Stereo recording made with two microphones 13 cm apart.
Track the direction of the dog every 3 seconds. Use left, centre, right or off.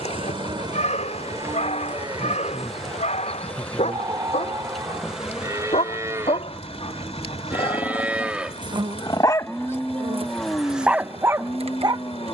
left, left, left, centre.